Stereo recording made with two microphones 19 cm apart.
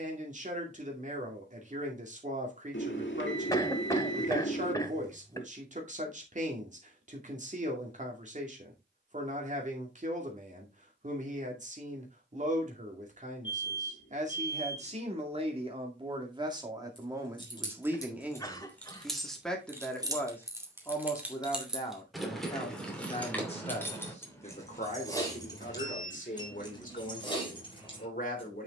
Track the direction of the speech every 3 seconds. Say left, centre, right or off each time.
right, right, right, right, right, right, centre, left, left, left.